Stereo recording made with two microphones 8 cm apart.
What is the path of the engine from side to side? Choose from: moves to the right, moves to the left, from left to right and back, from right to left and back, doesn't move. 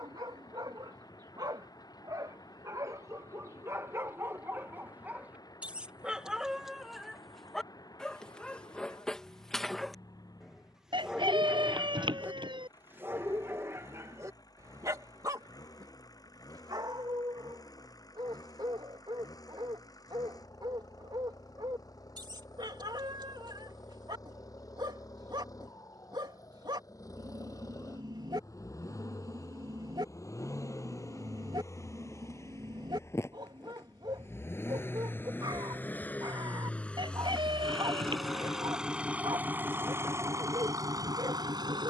moves to the right.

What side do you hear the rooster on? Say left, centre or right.
right.